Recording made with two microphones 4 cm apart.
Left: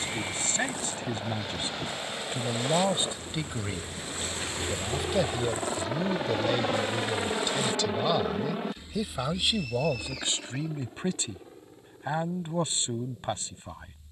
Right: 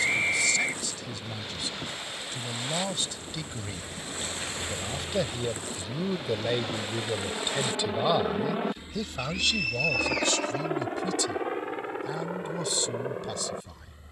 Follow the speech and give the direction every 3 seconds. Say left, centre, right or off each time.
left, centre, centre, left, left.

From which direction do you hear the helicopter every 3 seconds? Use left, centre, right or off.
left, left, centre, right, right.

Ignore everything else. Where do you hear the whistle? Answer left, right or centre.
right.